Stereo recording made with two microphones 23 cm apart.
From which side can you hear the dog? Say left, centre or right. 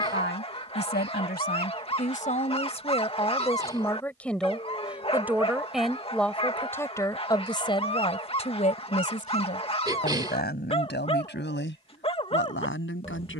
left.